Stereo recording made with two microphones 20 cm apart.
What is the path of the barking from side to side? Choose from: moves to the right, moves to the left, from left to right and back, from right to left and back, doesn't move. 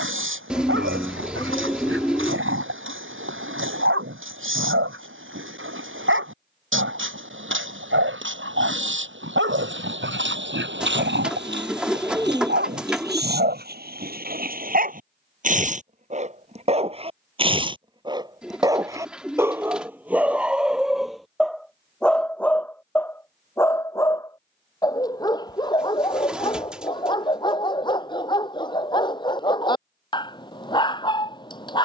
moves to the left.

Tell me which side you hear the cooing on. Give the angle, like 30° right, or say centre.
centre.